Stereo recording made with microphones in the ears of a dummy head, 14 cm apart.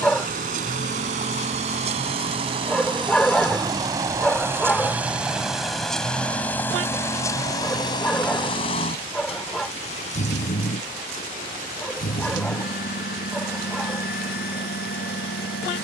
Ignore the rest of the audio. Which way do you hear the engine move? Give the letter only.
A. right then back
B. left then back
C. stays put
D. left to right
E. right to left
E.